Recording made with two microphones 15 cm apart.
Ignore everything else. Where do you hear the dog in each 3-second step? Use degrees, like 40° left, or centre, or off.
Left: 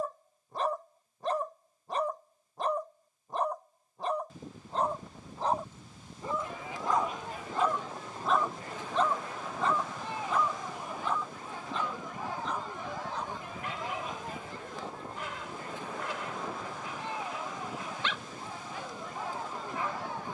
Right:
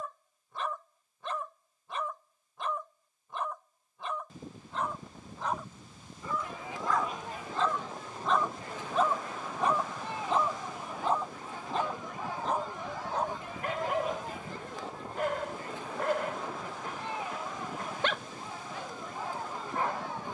40° left, 40° left, 20° left, 30° right, 60° right, 60° right, 60° right.